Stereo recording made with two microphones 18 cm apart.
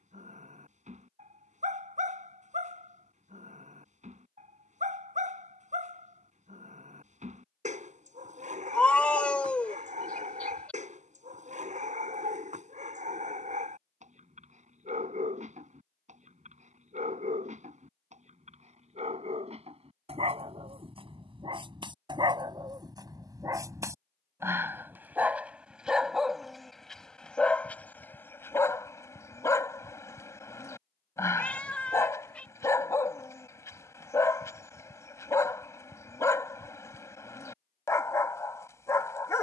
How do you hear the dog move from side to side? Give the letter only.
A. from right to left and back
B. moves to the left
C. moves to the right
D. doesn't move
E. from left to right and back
B.